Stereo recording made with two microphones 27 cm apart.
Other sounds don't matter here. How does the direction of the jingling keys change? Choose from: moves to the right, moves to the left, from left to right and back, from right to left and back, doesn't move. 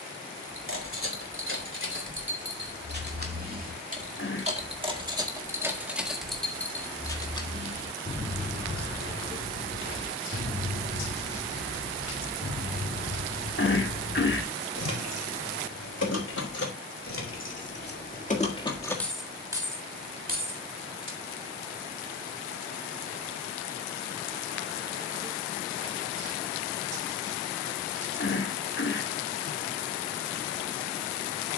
from right to left and back.